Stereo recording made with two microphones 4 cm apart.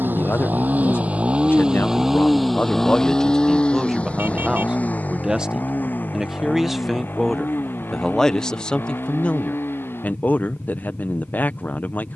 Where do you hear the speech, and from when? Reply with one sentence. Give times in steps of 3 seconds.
You can hear the speech on the left from 0 s, in the centre from 3 s and on the left from 9 s.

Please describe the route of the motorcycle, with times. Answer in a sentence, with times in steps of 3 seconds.
In this clip you hear the motorcycle on the right from 0 s and on the left from 3 s.